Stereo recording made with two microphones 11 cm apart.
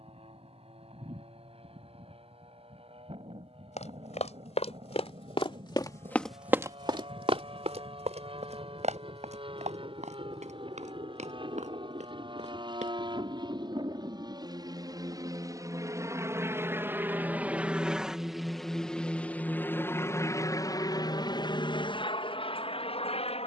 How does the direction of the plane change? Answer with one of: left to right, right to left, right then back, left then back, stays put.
right to left.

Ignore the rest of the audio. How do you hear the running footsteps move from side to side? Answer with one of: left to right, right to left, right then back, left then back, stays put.
left to right.